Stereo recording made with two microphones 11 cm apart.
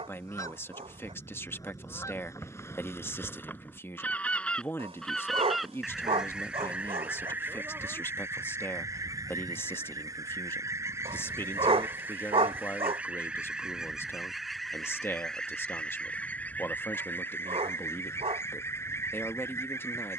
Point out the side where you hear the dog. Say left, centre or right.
right.